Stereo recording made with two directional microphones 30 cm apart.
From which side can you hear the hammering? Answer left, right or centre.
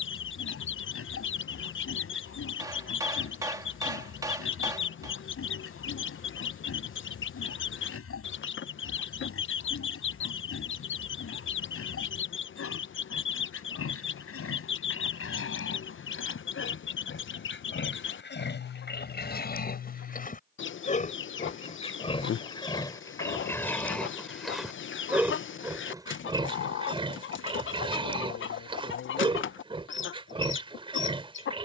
centre.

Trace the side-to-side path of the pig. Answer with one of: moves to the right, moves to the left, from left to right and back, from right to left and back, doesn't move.
moves to the right.